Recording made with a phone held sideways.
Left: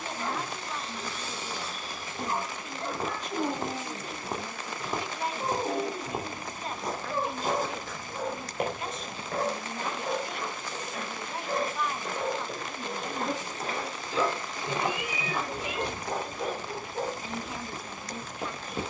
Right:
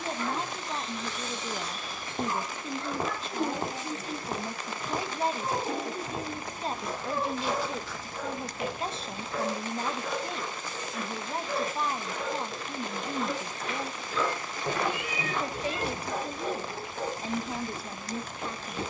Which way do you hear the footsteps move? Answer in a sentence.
You can hear the footsteps move from right to left and back again.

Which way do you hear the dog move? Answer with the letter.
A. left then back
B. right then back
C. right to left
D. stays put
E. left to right
D.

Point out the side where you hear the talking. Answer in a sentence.
You can hear the talking on the right.